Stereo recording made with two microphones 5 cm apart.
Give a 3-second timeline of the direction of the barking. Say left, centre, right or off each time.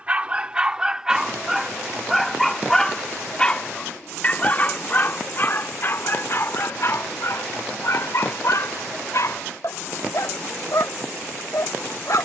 centre, left, left, left.